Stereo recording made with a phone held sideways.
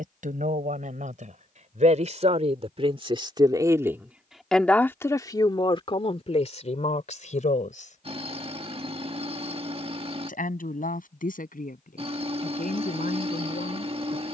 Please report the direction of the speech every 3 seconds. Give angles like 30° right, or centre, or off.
60° right, centre, 50° left, 70° left, 80° left.